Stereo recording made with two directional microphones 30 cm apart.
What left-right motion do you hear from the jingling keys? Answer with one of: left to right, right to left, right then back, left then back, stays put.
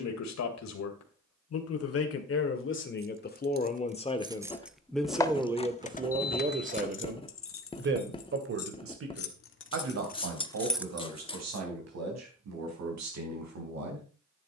left then back.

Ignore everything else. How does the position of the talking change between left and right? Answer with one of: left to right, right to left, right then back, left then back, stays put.
left to right.